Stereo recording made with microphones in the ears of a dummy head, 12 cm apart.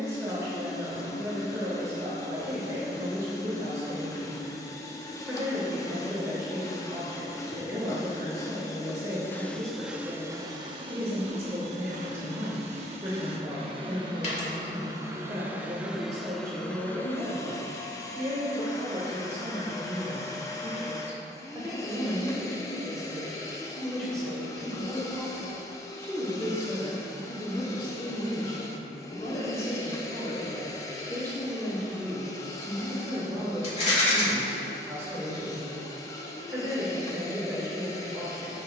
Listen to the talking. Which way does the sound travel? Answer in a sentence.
In this clip you hear the talking move from right to left and back again.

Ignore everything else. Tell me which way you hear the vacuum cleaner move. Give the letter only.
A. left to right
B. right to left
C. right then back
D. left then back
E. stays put
C.